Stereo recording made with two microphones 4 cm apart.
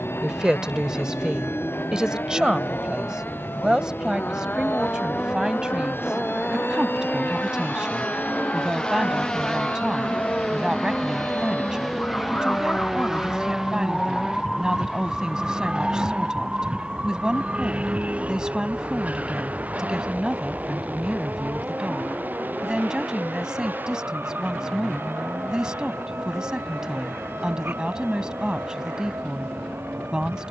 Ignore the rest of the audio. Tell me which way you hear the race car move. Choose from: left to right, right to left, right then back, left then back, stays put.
left to right.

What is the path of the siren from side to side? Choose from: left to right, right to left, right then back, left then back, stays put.
left to right.